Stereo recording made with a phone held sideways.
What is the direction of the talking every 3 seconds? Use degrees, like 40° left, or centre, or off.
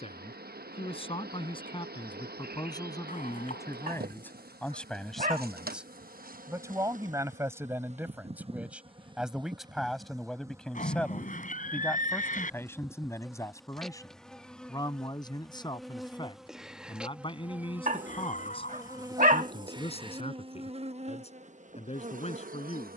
30° left, 10° left, 10° right, centre, 20° left, 30° left, 40° left, 40° left.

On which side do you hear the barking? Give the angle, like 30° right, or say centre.
50° right.